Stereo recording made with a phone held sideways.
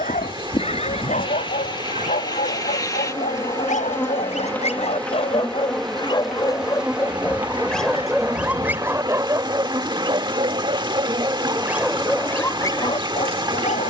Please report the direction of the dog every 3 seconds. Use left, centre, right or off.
left, left, centre, right, left.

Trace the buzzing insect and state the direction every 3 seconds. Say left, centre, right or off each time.
left, centre, centre, right, right.